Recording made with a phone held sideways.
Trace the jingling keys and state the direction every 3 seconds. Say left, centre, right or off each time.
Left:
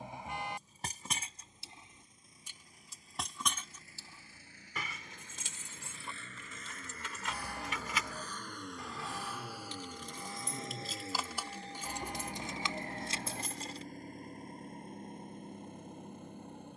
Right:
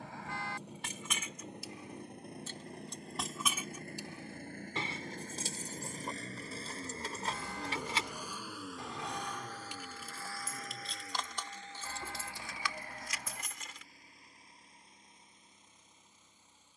left, right, right, centre, left, off.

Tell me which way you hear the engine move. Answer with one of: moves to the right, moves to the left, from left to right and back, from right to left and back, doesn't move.
moves to the left.